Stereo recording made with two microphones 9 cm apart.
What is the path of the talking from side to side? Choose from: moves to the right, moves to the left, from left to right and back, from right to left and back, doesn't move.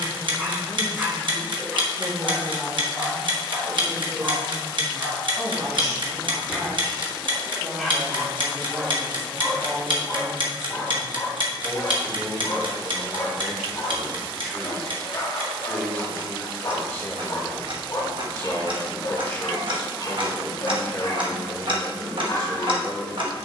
moves to the left.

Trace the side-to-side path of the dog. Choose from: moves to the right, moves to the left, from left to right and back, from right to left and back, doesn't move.
moves to the left.